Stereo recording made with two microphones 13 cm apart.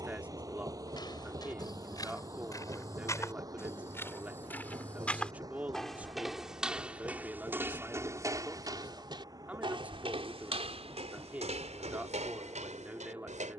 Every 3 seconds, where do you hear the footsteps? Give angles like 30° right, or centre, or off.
30° left, 10° left, 20° right, 50° right, 70° right.